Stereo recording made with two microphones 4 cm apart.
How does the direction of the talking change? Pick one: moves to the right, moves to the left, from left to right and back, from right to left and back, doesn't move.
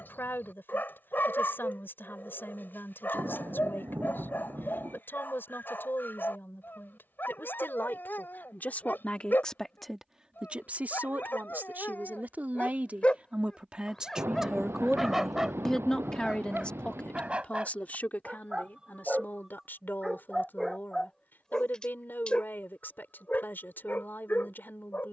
from left to right and back.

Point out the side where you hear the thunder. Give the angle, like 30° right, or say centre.
80° right.